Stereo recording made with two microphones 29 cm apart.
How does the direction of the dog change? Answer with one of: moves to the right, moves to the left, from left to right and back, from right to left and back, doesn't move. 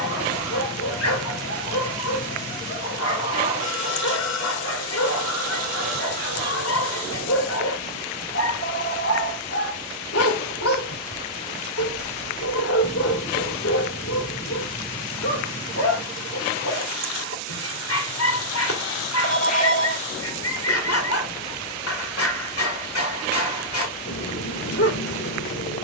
doesn't move.